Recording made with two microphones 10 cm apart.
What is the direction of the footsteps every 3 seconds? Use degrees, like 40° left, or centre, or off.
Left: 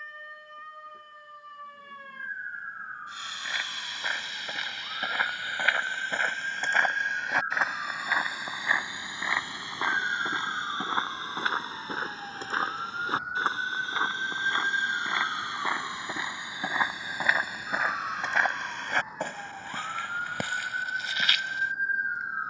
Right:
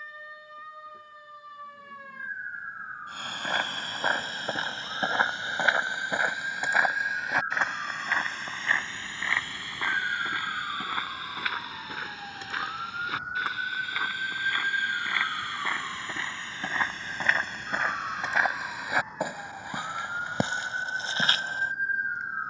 off, 40° right, centre, 20° left, 30° left, 10° left, 10° right, 30° right.